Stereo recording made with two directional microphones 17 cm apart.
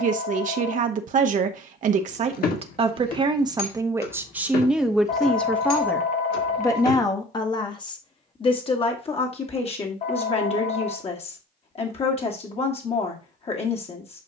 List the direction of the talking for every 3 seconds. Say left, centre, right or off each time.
right, centre, left, left, left.